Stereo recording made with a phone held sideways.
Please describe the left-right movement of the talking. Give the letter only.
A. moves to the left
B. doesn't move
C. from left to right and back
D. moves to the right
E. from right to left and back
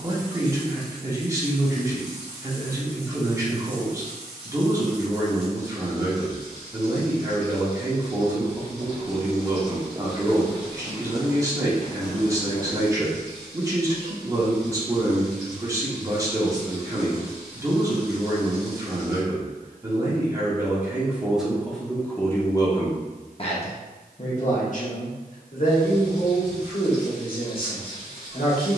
A.